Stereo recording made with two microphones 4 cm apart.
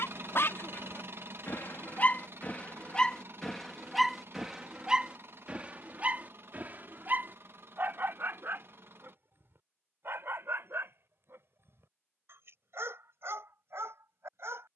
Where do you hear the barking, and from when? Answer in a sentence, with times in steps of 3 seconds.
In this clip you hear the barking on the left from 0 s, in the centre from 3 s and on the right from 6 s.